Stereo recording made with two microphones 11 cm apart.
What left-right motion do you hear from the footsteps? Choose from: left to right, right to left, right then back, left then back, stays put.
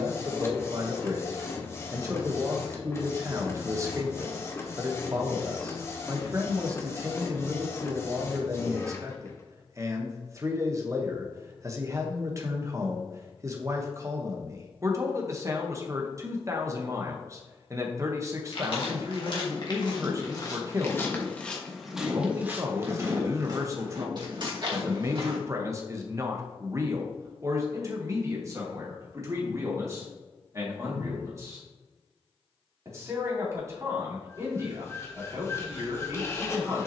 left to right.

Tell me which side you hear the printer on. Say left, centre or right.
left.